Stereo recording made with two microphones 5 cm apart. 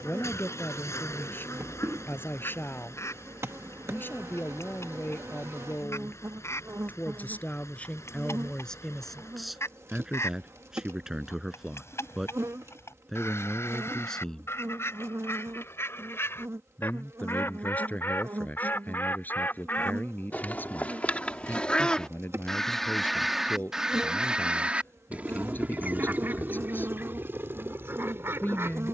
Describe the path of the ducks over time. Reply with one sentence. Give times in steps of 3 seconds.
In this clip you hear the ducks on the left from 0 s, in the centre from 21 s and on the right from 24 s.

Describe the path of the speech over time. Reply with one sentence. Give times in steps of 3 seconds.
In this clip you hear the speech on the left from 0 s, in the centre from 9 s and on the left from 15 s.